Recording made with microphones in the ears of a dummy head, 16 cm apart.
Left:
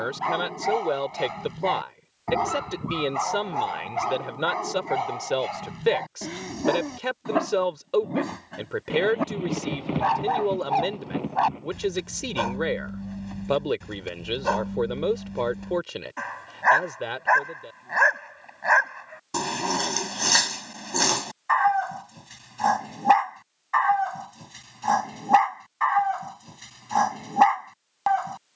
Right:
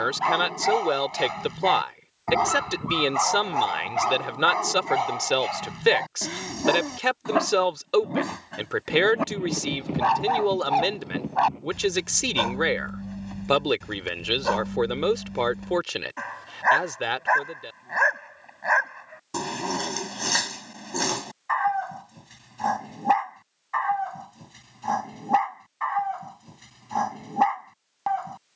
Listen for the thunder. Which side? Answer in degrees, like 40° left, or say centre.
50° left.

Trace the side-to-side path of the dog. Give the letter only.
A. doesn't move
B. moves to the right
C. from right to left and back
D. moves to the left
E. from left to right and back
D.